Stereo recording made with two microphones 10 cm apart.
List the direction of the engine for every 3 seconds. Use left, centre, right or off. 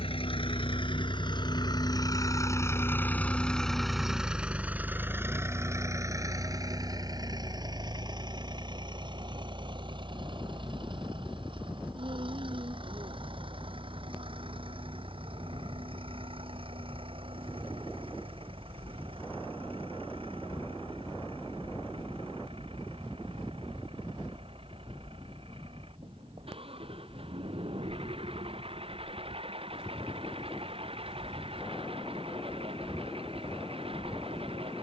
left, centre, right, right, right, right, right, right, right, right, right, right.